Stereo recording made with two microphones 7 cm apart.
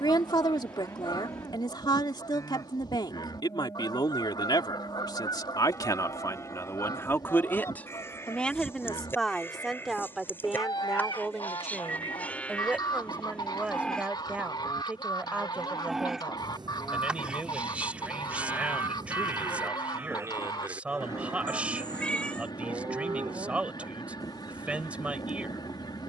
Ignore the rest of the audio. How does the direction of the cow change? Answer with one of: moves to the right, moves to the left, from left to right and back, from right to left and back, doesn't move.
moves to the right.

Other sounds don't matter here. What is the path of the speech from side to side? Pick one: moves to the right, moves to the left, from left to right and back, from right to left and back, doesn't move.
moves to the right.